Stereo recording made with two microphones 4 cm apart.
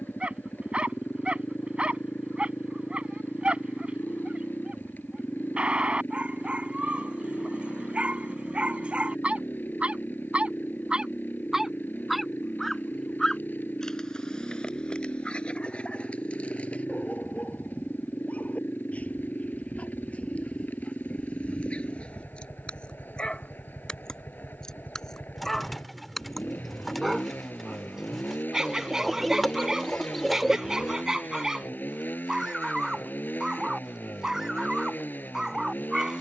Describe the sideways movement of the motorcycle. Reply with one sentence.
You can hear the motorcycle stay in one place.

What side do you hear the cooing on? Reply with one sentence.
In this clip you hear the cooing in the centre.